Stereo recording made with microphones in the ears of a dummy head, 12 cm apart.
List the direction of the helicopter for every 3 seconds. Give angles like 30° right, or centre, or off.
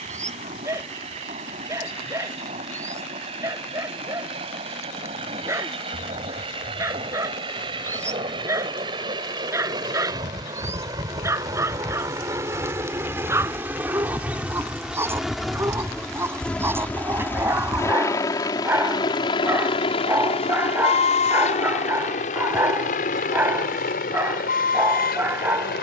50° right, 40° right, 40° right, 30° right, 20° right, 10° left, 40° left, 60° left, 70° left.